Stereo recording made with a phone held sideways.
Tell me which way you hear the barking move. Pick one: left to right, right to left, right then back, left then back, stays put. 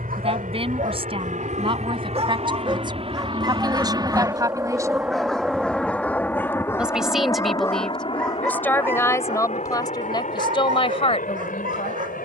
left then back.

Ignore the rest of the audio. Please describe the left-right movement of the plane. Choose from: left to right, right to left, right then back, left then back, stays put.
right to left.